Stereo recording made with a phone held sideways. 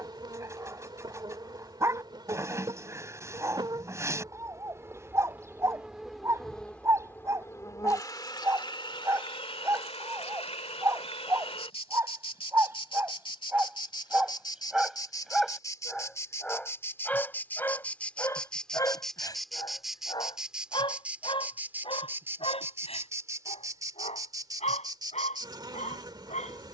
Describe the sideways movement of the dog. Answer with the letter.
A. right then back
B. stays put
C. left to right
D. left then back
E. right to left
E.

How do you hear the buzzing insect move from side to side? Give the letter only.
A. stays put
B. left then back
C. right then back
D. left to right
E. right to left
B.